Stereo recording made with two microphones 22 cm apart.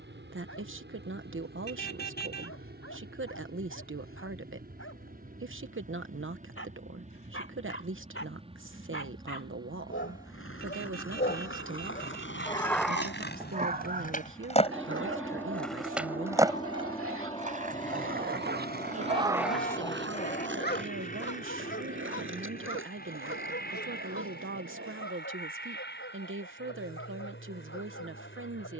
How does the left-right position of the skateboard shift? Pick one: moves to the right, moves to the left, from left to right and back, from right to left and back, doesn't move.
moves to the right.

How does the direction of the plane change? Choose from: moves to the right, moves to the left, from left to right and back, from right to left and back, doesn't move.
moves to the left.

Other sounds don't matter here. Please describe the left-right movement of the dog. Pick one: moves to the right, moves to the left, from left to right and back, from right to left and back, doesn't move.
from left to right and back.